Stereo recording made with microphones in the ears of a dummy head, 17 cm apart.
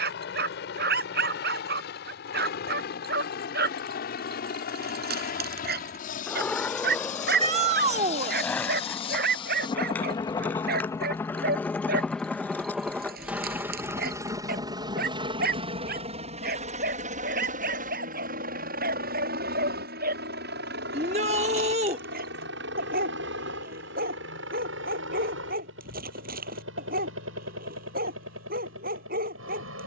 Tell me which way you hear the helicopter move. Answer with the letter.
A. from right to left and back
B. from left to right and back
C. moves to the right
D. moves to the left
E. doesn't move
C.